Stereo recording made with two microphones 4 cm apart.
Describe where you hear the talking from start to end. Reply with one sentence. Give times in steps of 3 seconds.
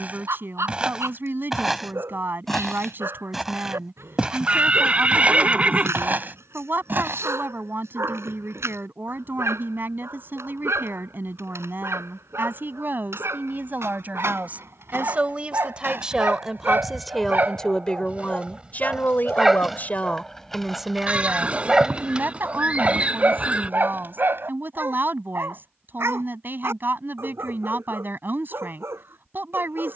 You can hear the talking on the right from 0 s, in the centre from 15 s, on the left from 18 s and on the right from 21 s.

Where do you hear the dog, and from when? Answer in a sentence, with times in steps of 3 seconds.
You can hear the dog on the right from 0 s, in the centre from 18 s and on the right from 21 s.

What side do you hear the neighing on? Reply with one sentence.
You can hear the neighing on the right.